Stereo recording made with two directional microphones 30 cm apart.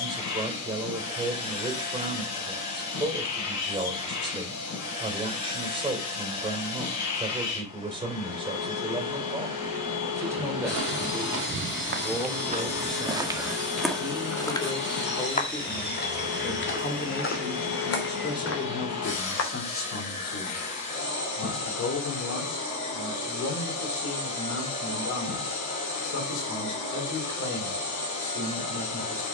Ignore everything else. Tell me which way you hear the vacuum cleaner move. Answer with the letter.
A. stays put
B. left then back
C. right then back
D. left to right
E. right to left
A.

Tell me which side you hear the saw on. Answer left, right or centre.
left.